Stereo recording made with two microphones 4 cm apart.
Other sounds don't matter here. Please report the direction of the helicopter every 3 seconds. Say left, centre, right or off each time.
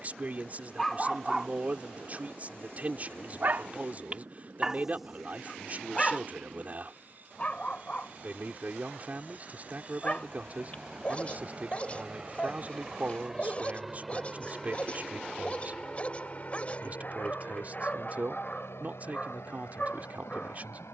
right, right, right, right, centre, left, left.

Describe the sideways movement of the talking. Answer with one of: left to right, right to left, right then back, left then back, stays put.
stays put.